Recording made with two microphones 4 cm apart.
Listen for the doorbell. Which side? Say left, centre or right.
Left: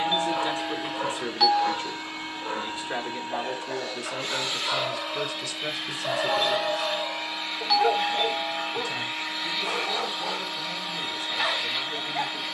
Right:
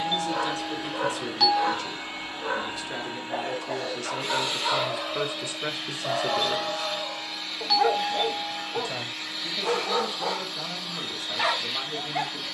centre.